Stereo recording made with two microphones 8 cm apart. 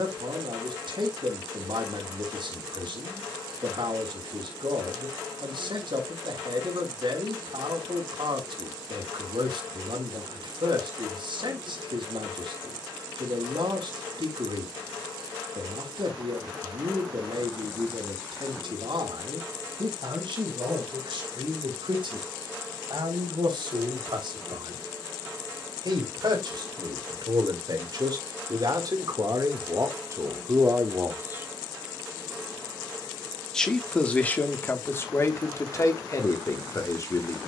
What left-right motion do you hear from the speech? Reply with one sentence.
In this clip you hear the speech go from the right side to the left.